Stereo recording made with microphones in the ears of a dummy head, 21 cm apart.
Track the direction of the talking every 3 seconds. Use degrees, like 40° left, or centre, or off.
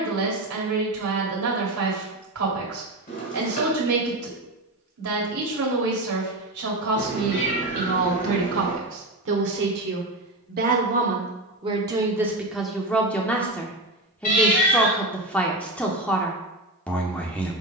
70° right, 70° right, 70° right, 40° right, centre, 10° left.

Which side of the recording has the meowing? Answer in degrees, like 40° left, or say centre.
40° left.